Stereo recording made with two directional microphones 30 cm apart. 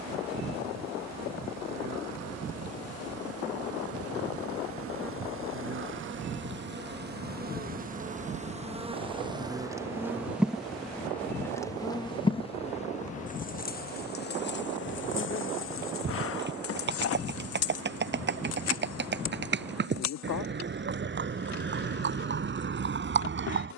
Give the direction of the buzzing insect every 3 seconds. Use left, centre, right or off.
right, right, right, centre, left, left, left, left.